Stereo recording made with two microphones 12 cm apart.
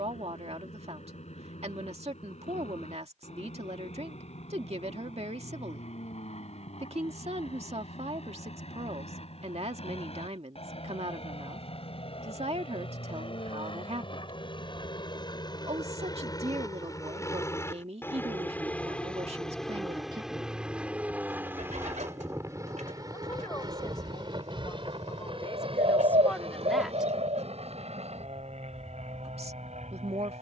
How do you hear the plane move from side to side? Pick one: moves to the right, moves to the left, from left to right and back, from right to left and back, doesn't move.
moves to the right.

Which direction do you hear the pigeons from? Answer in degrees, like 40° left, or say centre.
80° right.